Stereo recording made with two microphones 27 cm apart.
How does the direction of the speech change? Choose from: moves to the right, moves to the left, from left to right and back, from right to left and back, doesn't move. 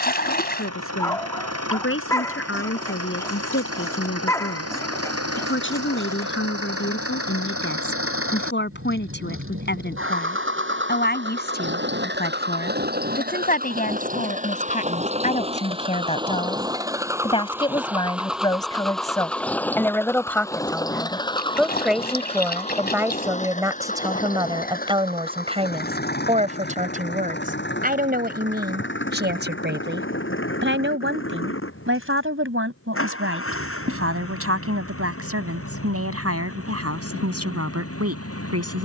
moves to the right.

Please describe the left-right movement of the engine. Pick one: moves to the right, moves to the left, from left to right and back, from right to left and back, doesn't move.
moves to the left.